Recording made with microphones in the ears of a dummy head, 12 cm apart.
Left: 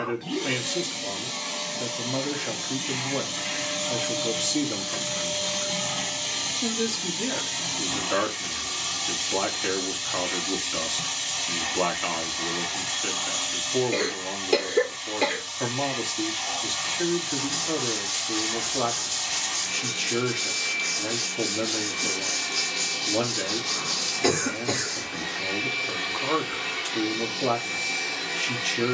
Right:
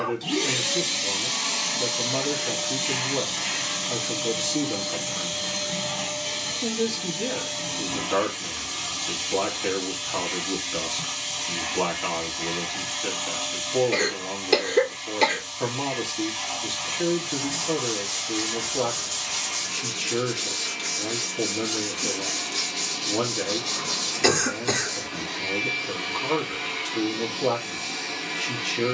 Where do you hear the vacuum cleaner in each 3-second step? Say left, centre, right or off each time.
right, centre, left, left, left, left, left, left, left, left.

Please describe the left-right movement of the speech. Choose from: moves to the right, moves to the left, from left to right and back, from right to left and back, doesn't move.
doesn't move.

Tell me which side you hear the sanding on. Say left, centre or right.
centre.